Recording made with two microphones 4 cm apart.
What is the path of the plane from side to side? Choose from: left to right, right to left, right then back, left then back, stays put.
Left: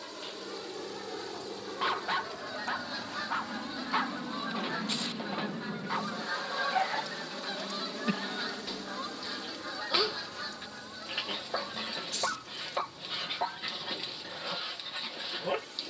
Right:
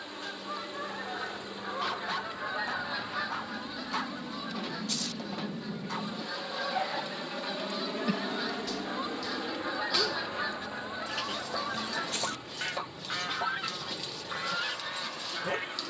left to right.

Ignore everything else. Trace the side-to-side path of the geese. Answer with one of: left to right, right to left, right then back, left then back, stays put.
left then back.